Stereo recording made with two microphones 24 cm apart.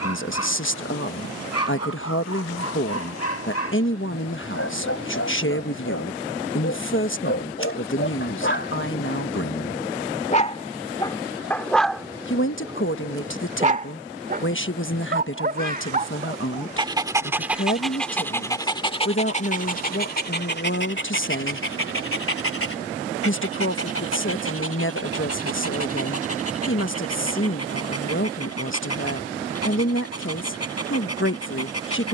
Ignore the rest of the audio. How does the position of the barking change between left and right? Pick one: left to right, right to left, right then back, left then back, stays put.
right then back.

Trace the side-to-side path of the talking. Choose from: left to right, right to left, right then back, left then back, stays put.
stays put.